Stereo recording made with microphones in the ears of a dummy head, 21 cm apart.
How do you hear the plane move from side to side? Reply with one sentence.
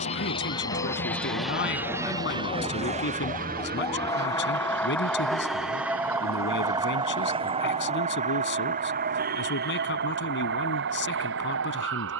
You can hear the plane move from left to right.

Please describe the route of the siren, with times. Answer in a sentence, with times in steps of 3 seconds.
In this clip you hear the siren on the left from 0 s, in the centre from 3 s and on the right from 6 s.